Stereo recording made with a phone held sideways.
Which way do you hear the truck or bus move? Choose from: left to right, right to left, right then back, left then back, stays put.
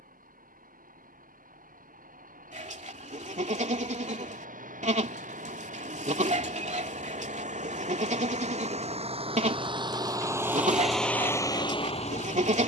right to left.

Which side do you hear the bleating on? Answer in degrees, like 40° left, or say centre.
50° right.